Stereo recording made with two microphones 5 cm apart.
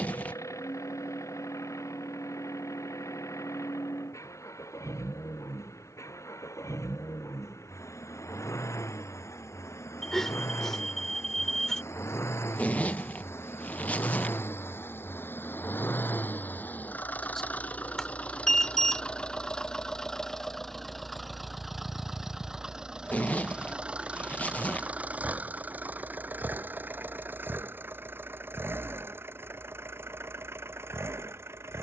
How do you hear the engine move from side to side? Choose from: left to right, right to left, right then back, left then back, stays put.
left to right.